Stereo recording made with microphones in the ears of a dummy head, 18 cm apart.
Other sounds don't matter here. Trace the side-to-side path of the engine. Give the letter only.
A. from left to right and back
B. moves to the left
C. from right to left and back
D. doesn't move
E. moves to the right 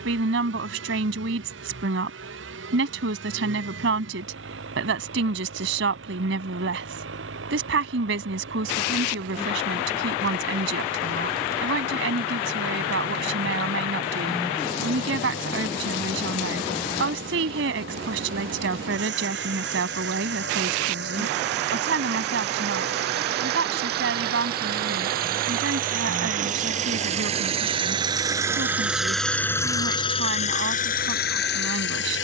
B.